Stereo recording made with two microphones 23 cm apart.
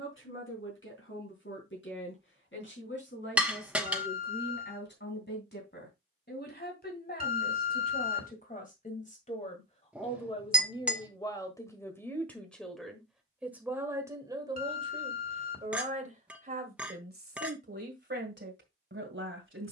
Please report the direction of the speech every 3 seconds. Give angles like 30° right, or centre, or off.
60° left, 50° left, 40° left, 20° left, 10° right, 40° right, 50° right.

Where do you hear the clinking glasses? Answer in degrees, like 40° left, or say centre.
centre.